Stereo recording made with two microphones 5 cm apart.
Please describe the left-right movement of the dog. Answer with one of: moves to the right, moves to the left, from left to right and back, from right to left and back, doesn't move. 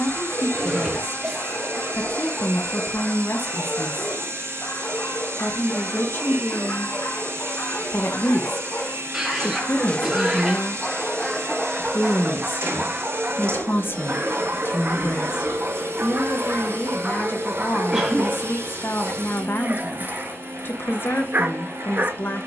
moves to the right.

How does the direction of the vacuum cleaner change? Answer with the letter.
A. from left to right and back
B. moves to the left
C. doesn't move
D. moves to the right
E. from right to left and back
C.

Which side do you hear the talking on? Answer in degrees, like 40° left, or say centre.
50° left.